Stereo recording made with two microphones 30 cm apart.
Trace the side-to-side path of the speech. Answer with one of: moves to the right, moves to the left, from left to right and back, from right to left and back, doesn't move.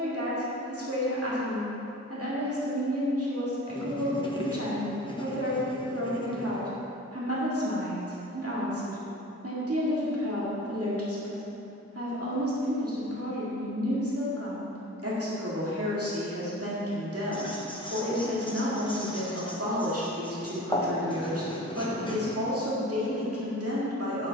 doesn't move.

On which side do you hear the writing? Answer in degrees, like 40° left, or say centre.
20° left.